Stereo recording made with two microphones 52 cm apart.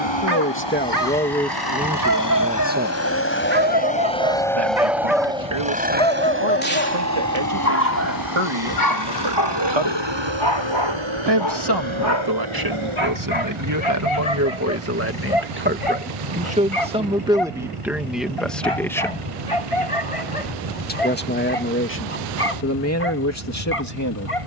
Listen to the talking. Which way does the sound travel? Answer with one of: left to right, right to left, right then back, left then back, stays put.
right then back.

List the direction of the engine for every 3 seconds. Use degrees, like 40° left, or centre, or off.
40° left, centre, 30° right, 50° right, 60° right, 70° right, 70° right, 70° right.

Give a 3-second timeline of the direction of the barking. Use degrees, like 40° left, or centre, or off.
40° right, 10° right, 20° left, 50° left, 60° left, 70° left, 70° left, 80° left.